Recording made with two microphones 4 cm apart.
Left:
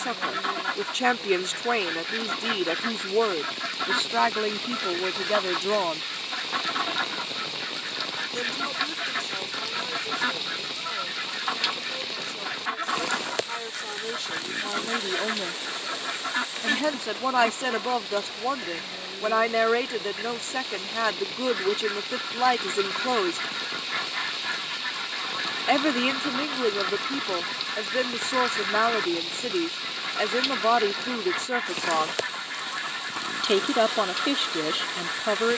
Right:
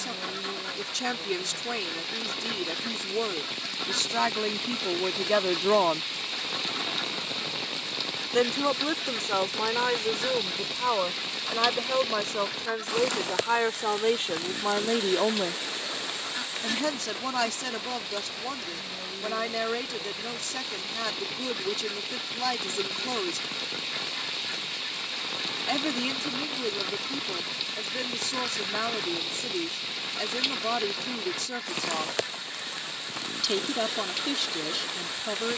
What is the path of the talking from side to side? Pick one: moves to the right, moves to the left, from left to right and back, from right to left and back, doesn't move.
from left to right and back.